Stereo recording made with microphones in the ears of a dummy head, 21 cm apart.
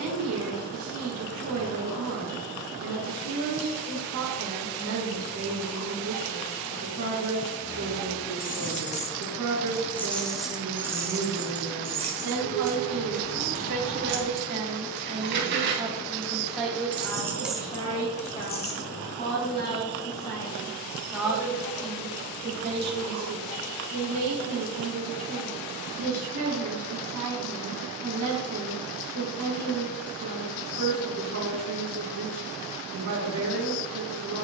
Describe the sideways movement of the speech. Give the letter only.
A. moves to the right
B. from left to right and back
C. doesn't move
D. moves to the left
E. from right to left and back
E.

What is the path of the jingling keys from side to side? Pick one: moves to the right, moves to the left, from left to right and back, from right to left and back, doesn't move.
from left to right and back.